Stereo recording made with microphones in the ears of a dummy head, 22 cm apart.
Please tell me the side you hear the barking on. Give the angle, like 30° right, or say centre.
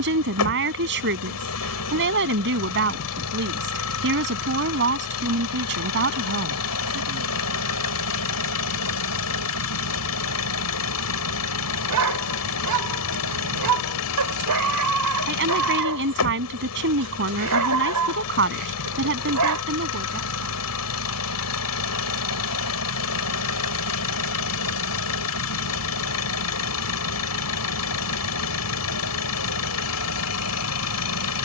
80° right.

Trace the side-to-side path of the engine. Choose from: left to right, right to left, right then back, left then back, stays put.
stays put.